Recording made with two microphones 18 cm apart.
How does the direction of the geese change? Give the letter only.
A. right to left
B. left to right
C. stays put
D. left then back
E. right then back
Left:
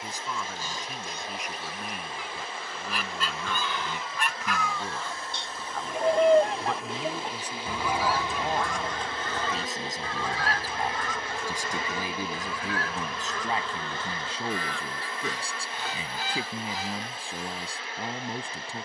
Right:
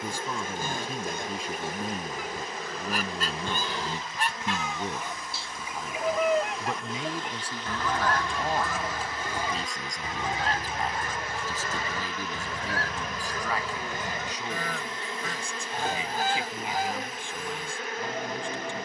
D.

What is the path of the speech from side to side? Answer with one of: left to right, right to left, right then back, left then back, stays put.
right to left.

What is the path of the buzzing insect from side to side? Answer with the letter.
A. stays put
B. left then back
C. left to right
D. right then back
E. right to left
B.